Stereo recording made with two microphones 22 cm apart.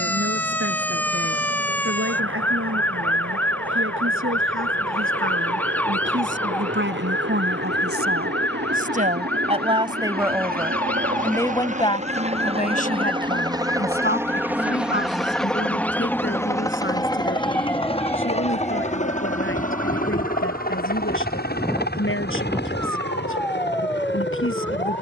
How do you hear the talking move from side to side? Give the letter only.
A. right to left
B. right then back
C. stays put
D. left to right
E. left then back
A.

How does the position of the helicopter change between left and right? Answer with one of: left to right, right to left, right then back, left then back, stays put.
right to left.